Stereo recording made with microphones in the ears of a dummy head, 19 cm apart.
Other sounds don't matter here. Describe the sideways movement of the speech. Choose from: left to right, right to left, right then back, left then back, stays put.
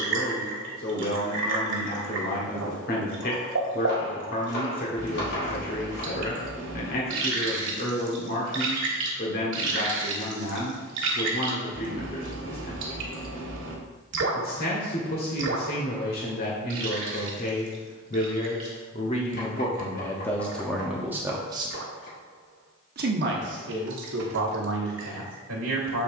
left to right.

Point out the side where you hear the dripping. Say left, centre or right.
right.